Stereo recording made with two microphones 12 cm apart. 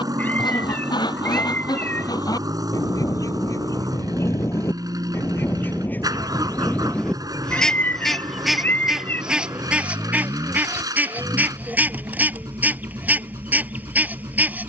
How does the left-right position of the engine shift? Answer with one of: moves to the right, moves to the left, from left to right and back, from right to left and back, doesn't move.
doesn't move.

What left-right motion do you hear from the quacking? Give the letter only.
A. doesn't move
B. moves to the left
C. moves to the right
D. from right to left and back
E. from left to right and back
C.